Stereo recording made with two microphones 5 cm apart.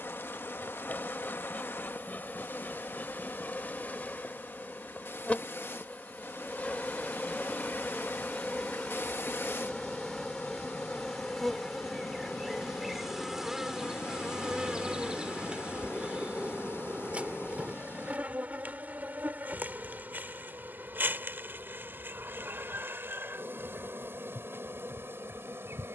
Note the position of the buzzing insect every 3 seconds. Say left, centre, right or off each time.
left, left, left, centre, centre, right, right, right, right.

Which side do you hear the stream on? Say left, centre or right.
left.